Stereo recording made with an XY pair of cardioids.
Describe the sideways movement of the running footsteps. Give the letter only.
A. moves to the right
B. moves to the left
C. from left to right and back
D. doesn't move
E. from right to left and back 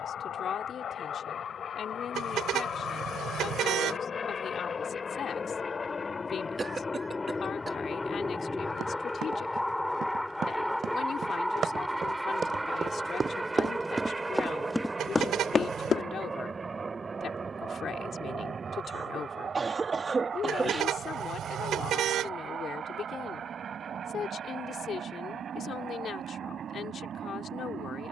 B.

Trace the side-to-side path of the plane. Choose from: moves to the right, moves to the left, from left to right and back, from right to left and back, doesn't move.
moves to the right.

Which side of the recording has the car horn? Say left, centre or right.
right.